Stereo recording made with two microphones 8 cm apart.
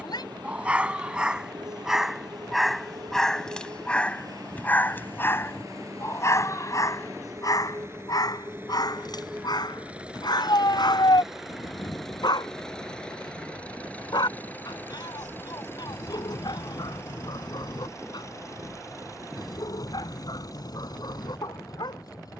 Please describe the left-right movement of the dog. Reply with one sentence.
In this clip you hear the dog go from the right side to the left.